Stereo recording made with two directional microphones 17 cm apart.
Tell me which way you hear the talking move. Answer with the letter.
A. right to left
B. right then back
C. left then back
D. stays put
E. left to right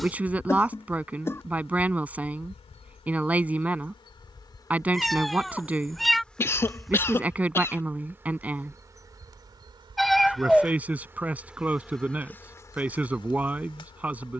D.